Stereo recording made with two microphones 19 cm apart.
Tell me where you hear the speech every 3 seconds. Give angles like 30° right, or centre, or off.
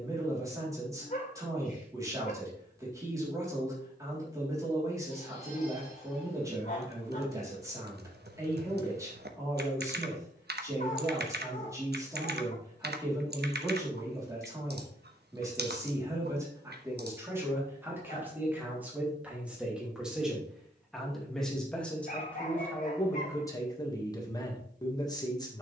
20° right, 20° right, 20° right, 20° right, 20° right, 10° right, 10° right, 10° left, 20° left.